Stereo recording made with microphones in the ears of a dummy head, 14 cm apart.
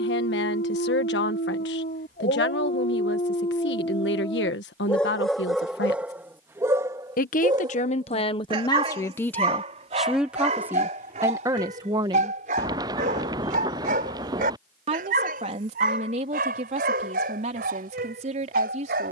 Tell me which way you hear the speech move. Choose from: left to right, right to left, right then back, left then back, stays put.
left to right.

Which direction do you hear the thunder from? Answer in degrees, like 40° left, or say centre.
20° right.